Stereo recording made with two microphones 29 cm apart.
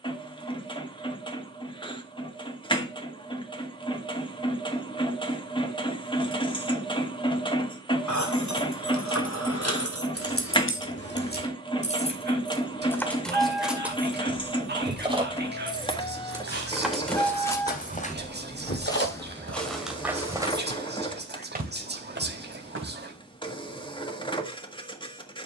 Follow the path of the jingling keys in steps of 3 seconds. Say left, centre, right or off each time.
off, off, left, left, centre, centre, left, off, off.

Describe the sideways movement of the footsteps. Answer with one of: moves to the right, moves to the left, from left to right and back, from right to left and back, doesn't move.
moves to the right.